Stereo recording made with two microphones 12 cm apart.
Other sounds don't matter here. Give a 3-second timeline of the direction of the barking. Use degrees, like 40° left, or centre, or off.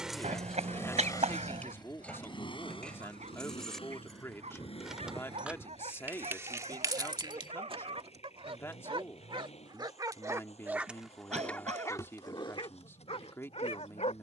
70° right, 70° right, 60° right, 10° right, 50° left.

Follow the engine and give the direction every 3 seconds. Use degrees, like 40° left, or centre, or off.
30° left, 50° left, 60° left, 60° left, 60° left.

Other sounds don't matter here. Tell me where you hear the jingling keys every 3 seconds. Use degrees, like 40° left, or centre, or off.
10° left, centre, 30° right, off, off.